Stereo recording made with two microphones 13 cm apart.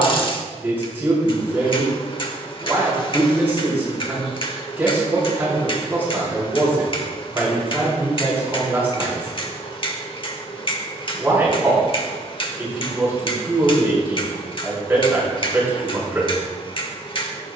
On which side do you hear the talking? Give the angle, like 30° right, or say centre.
10° right.